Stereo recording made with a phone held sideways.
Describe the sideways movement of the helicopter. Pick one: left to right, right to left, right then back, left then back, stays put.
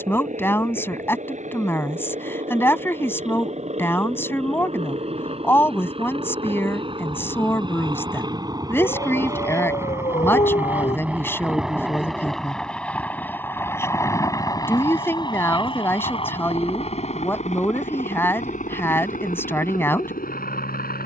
right to left.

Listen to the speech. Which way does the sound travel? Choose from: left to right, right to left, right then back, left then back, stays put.
stays put.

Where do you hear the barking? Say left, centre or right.
left.